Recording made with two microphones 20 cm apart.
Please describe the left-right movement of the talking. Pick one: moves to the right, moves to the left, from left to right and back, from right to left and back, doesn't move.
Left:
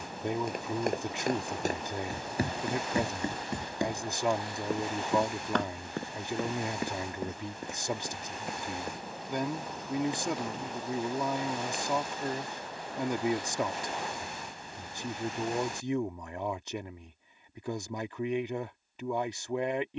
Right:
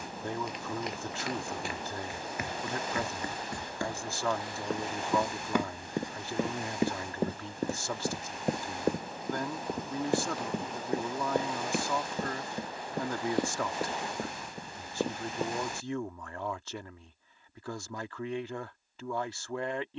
doesn't move.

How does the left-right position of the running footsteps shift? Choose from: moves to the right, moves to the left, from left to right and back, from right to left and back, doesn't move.
moves to the right.